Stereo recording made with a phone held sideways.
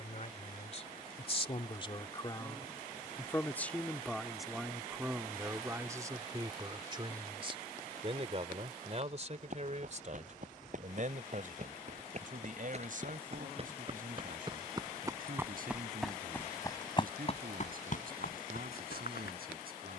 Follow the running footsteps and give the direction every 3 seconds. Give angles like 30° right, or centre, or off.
off, off, off, 50° right, 40° right, 20° left, 70° left.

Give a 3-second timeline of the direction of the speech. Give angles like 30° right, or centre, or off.
40° left, centre, 30° right, 50° right, 60° right, 70° right, 70° right.